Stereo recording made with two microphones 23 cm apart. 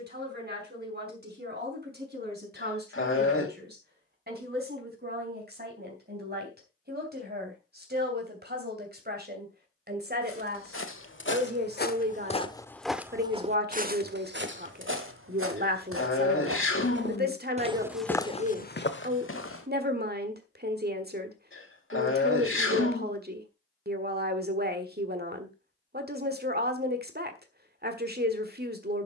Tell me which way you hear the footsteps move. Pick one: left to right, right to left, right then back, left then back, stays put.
right then back.